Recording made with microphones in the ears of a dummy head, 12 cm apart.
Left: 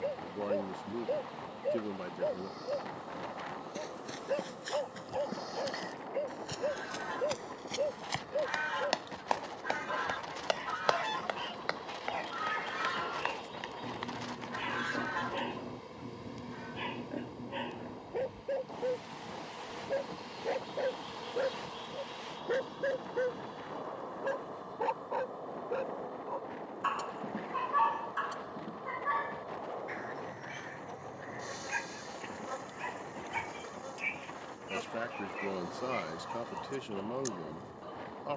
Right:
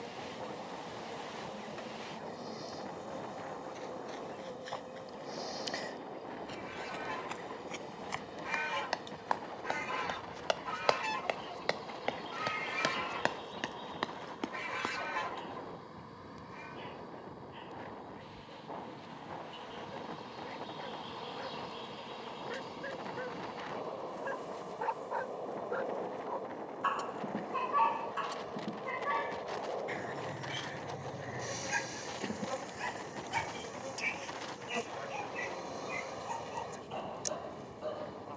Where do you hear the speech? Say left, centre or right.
left.